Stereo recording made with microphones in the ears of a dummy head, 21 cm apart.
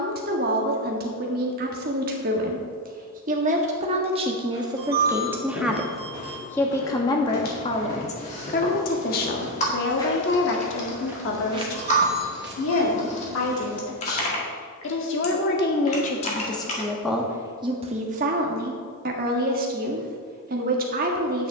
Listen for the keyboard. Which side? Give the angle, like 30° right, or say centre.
30° left.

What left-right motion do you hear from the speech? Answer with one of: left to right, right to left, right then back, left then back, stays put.
left then back.